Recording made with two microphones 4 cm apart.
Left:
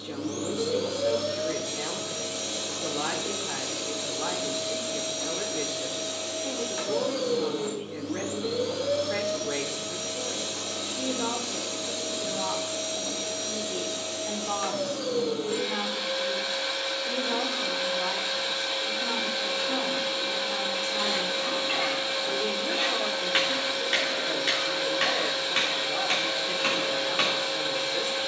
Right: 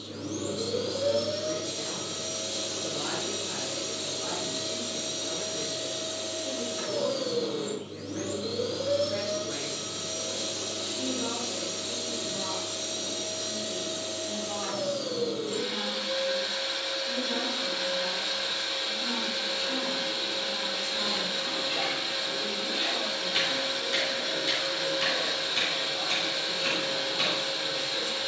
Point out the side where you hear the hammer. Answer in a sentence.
In this clip you hear the hammer on the left.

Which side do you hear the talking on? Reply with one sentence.
You can hear the talking on the left.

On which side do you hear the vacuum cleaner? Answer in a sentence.
You can hear the vacuum cleaner on the left.